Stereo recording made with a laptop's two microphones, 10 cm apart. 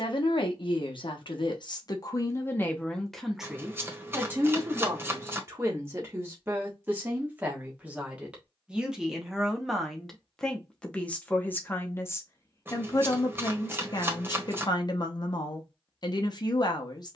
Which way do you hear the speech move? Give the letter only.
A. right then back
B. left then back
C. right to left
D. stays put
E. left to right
A.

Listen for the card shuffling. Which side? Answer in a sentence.
In this clip you hear the card shuffling on the right.